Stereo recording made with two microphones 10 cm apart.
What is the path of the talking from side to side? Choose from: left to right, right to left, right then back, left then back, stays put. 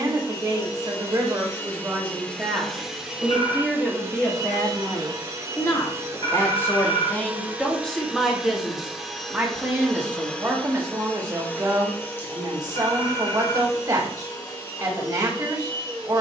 left then back.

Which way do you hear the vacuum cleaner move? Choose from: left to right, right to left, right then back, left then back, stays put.
right then back.